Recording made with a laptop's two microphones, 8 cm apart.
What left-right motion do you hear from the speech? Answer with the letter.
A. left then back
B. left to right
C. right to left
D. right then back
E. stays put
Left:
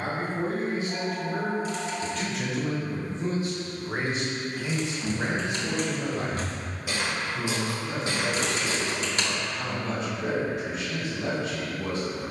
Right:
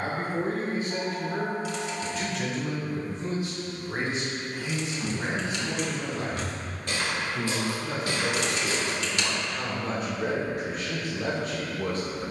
A.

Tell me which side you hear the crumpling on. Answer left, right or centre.
left.